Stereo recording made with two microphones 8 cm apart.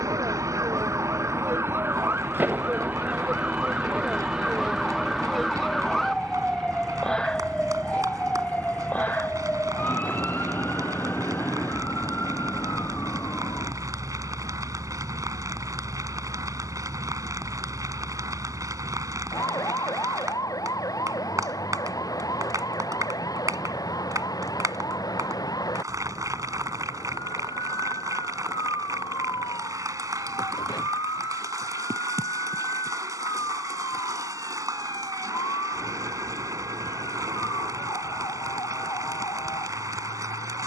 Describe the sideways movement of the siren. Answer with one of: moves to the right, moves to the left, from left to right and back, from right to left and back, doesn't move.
moves to the left.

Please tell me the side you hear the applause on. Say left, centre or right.
right.